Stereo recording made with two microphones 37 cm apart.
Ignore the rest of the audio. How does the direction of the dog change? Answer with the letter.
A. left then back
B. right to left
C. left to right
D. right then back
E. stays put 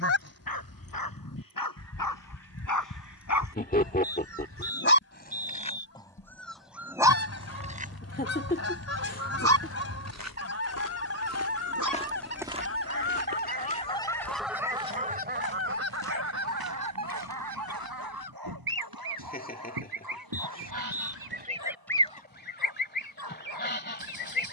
C.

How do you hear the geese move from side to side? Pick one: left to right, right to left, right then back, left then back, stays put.
right then back.